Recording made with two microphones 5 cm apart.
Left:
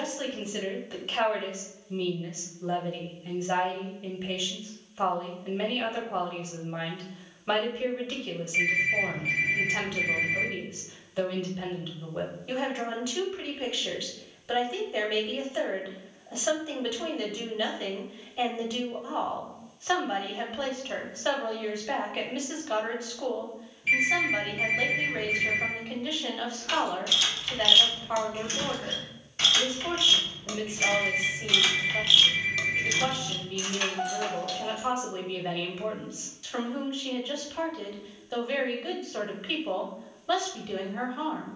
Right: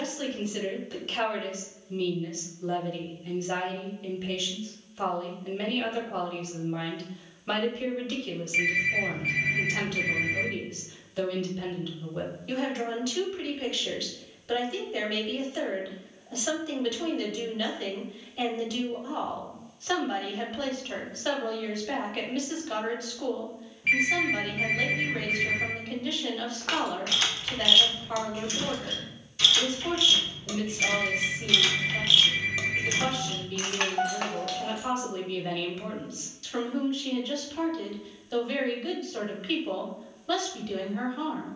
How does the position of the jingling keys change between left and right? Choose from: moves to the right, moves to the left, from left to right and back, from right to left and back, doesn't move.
from right to left and back.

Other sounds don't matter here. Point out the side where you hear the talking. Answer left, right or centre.
centre.